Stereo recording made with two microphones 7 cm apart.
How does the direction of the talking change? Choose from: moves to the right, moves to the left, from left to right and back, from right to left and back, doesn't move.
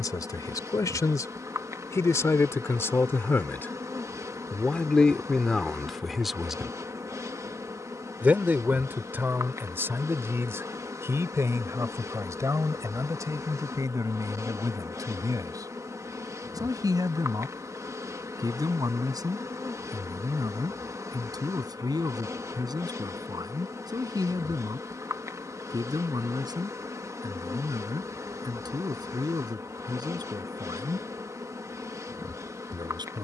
moves to the right.